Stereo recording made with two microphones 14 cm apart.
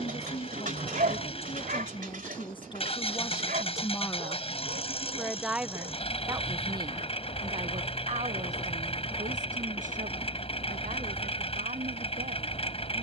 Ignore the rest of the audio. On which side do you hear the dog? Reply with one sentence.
In this clip you hear the dog on the right.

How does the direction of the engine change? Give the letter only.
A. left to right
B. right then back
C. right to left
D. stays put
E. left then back
D.